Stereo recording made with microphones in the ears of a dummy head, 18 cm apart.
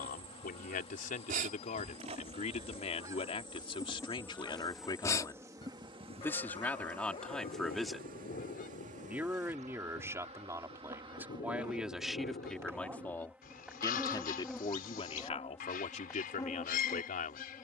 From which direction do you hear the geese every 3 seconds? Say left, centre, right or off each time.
right, centre, left, left, left, left.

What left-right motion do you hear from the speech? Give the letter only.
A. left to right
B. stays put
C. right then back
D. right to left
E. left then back
C.